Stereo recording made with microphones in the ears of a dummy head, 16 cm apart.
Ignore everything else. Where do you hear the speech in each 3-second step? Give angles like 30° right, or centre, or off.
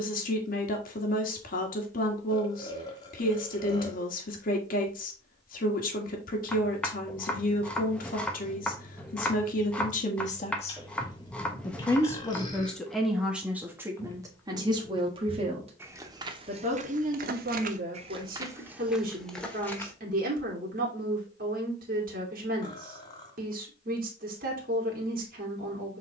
50° left, 50° left, 50° left, 40° left, 10° right, 40° right, 50° right, 50° right, 50° right.